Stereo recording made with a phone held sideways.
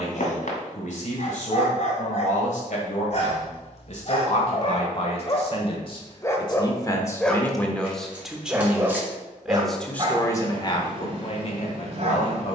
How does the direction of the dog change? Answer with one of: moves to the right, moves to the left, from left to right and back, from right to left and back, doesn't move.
moves to the right.